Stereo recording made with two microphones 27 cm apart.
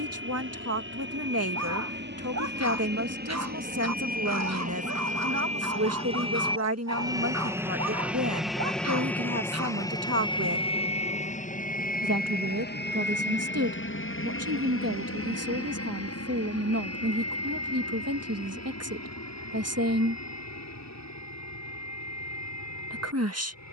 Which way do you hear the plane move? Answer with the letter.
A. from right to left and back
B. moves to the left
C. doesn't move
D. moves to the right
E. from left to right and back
B.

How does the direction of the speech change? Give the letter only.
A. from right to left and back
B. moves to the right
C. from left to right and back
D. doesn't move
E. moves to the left
D.